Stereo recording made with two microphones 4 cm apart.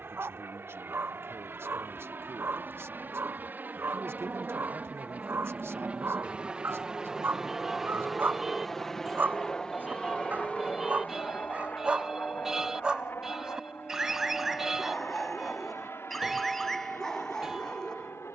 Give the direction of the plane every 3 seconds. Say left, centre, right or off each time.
right, right, centre, left, left, left.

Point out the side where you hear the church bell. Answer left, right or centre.
centre.